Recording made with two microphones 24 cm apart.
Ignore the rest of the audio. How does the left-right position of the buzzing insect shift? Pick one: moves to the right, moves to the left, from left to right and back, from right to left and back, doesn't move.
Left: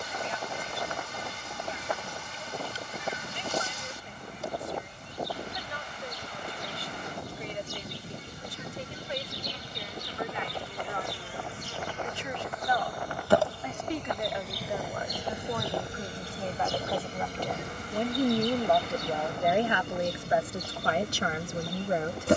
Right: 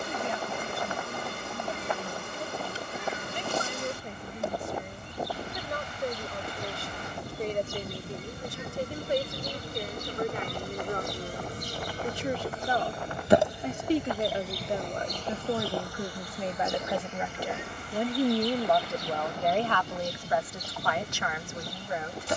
moves to the left.